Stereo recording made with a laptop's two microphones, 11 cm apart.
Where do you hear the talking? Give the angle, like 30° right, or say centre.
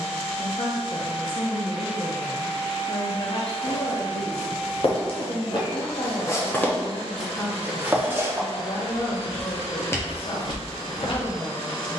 60° left.